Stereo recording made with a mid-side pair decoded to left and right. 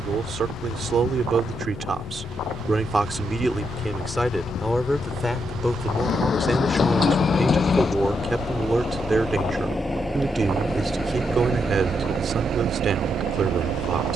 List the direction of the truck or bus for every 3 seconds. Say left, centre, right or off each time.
left, left, left, centre, right.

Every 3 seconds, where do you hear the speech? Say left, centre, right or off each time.
right, centre, centre, right, right.